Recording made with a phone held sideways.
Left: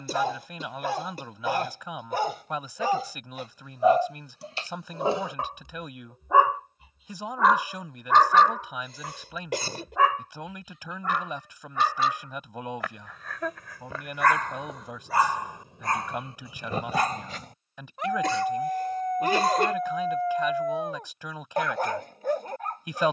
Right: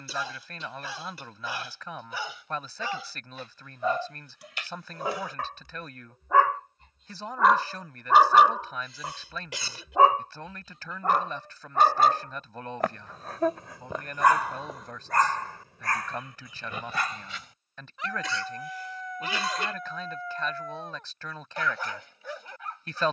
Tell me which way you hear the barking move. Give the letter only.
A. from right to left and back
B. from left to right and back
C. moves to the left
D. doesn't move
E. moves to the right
B.